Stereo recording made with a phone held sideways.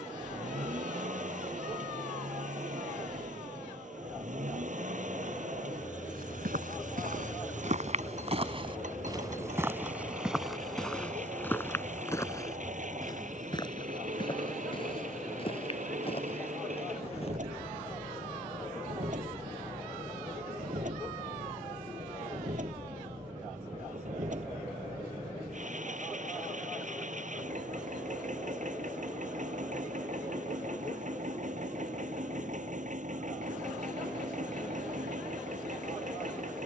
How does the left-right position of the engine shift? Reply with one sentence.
In this clip you hear the engine stay in one place.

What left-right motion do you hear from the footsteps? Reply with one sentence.
You can hear the footsteps travel towards the left.